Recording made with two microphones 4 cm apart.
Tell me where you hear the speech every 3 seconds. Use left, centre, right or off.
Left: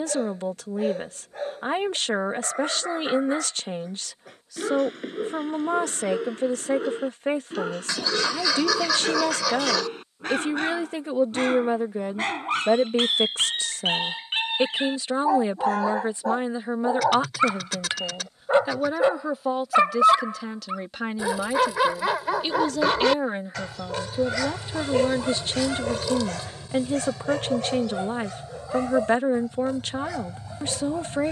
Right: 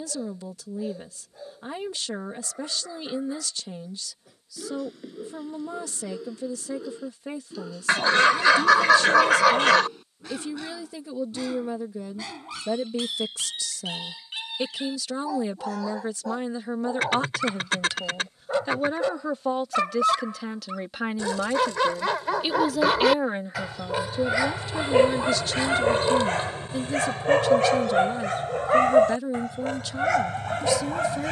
left, left, left, left, left, left, centre, centre, left, left, left.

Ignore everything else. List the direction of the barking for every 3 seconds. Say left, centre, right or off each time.
left, left, left, left, left, left, left, centre, right, right, right.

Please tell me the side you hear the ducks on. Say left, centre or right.
right.